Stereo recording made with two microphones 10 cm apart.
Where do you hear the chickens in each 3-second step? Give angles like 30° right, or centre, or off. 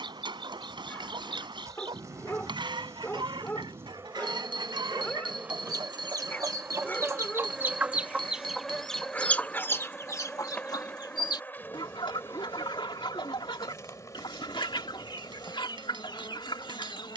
60° right, 60° right, 20° right, 40° left, 60° left, 60° left.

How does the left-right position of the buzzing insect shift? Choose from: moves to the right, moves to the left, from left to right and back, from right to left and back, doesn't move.
moves to the left.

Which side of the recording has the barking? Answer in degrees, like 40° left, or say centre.
20° left.